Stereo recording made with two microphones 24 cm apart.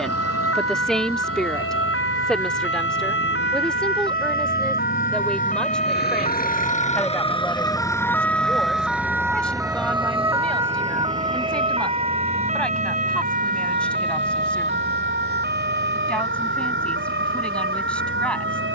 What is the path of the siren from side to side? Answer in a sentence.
You can hear the siren travel towards the right.